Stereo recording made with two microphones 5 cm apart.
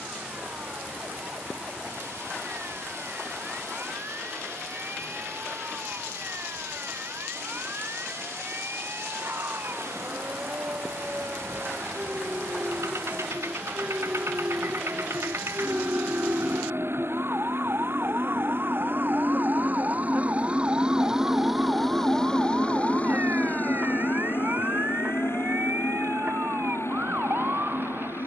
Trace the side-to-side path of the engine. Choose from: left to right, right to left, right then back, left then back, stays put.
right to left.